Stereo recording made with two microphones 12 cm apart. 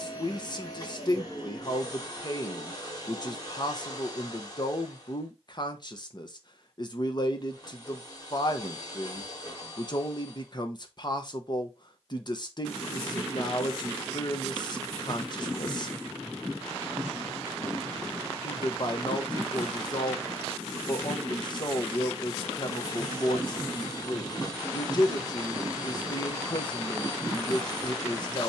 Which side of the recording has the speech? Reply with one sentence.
In this clip you hear the speech on the left.